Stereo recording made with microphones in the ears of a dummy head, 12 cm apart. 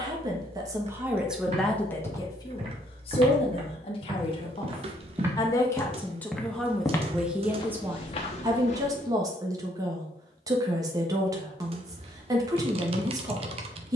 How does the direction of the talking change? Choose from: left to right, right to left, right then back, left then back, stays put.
left then back.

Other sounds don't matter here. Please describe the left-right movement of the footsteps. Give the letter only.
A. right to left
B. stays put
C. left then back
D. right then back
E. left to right
A.